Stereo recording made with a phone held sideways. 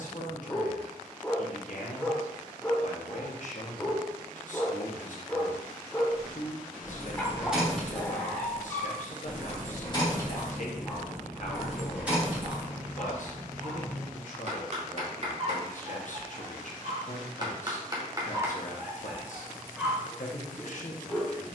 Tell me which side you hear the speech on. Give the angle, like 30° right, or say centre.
60° left.